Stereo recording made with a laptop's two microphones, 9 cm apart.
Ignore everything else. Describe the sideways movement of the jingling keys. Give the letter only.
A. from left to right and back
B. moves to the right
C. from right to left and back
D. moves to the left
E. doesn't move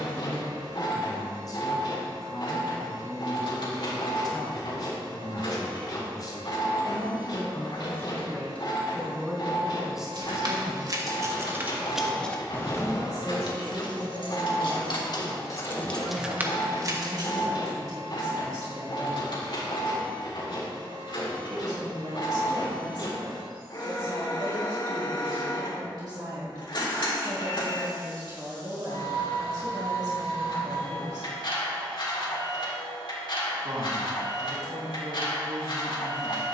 C.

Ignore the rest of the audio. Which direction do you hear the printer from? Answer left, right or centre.
left.